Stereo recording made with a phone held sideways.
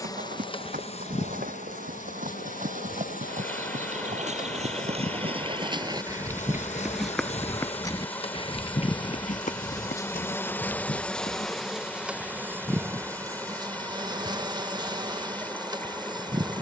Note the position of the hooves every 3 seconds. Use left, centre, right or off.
right, right, centre, left, off, off.